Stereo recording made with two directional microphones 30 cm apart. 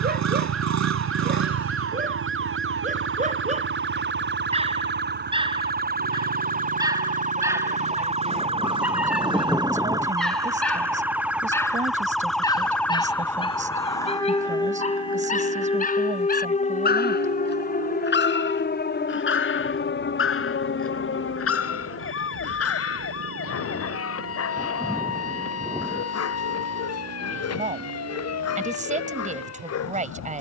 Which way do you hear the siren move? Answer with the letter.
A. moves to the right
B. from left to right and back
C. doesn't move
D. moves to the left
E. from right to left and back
D.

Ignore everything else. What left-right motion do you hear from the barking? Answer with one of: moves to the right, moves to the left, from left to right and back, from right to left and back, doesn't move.
moves to the left.